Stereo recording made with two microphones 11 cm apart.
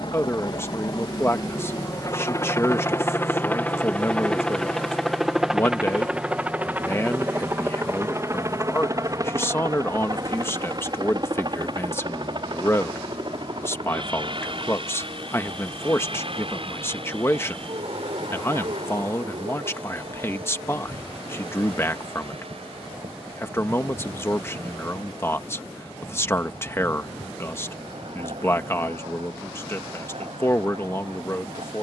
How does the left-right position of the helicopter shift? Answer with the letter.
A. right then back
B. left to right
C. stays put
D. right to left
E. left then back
B.